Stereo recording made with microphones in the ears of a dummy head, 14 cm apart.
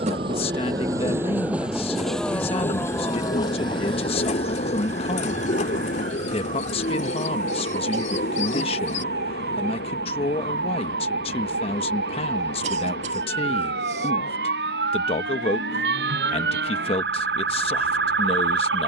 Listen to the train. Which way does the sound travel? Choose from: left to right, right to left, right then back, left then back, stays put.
right to left.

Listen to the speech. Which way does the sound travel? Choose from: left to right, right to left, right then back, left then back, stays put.
stays put.